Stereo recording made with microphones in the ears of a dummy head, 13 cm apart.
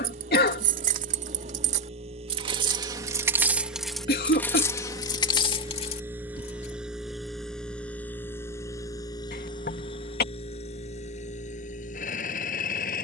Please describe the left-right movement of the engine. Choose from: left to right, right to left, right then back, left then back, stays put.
right to left.